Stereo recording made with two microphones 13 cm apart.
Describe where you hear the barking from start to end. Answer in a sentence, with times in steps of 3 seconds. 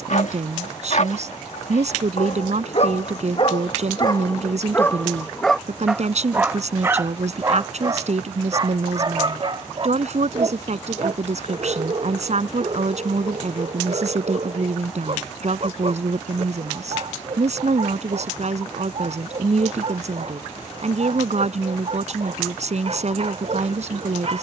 You can hear the barking on the left from 0 s and on the right from 6 s.